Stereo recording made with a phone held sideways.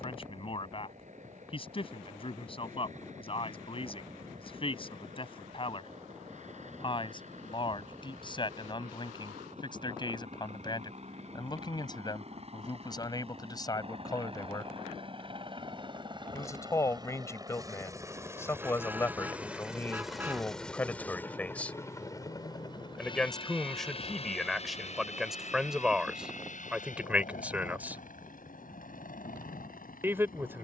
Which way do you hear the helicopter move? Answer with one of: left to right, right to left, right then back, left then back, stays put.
right to left.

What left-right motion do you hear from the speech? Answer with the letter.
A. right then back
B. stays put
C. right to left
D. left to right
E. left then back
D.